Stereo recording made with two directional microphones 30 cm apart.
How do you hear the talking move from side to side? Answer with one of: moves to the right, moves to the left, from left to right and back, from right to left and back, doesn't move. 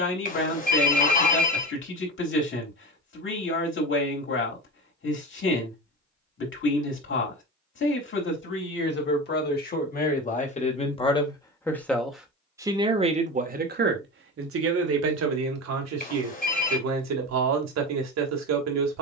moves to the right.